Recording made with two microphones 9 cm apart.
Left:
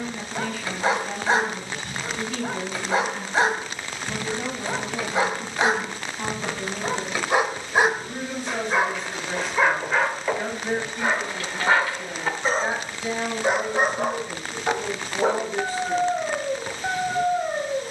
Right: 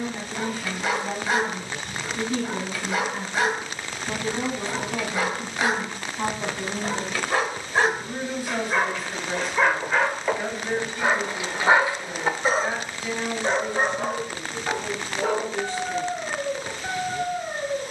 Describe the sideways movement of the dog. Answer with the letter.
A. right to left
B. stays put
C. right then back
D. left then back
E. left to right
C.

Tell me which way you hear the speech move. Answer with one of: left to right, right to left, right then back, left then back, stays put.
right to left.